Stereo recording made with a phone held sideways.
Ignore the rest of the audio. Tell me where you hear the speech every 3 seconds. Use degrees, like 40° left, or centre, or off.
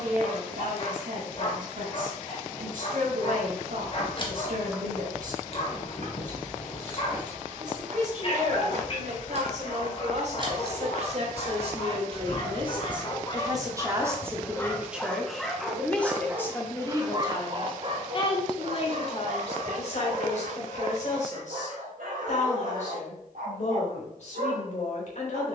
70° right, 70° right, 60° right, 50° right, 20° right, 20° left, 50° left, 60° left, 60° left.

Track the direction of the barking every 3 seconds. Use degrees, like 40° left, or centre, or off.
40° left, 40° left, 40° left, 40° left, 30° left, 20° right, 60° right, 70° right, 80° right.